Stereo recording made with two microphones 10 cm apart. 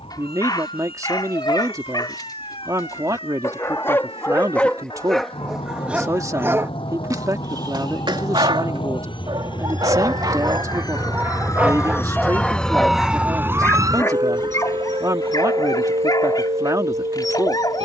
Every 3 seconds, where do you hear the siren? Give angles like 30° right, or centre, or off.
70° left, 70° left, 60° left, 40° left, 20° right, 70° right.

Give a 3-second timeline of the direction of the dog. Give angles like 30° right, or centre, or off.
40° left, 10° left, 40° right, 30° right, 20° left, 40° left.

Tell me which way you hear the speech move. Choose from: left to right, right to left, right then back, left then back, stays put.
stays put.